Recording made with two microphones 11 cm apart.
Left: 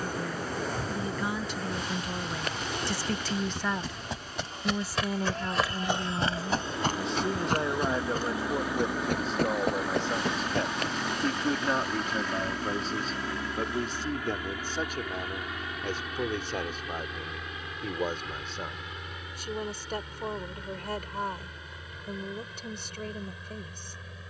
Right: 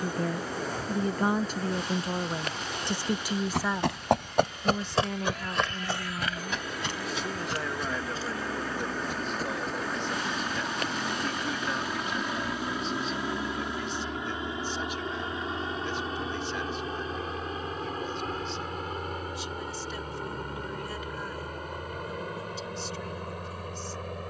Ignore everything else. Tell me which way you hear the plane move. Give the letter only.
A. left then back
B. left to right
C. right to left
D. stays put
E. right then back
B.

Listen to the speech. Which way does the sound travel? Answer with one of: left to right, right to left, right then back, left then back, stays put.
right to left.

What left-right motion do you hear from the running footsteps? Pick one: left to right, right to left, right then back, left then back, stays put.
right to left.